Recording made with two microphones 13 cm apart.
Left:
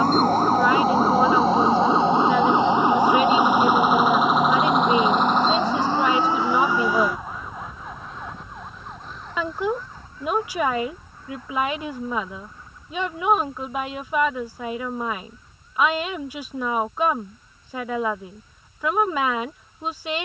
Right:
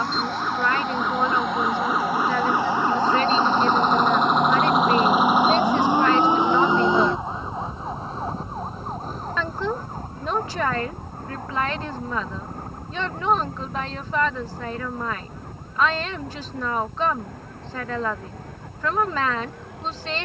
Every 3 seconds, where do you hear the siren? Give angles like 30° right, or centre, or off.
30° left, centre, 30° right, 50° right, 60° right, 60° right, 70° right.